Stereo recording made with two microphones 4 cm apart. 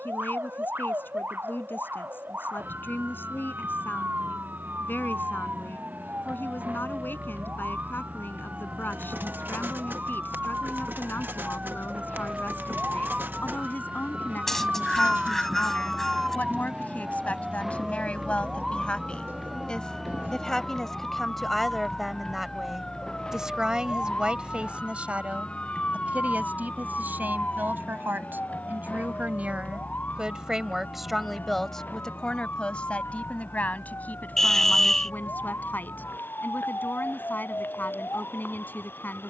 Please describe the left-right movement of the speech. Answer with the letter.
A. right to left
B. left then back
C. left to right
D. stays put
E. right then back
E.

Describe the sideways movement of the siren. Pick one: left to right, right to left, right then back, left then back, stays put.
right to left.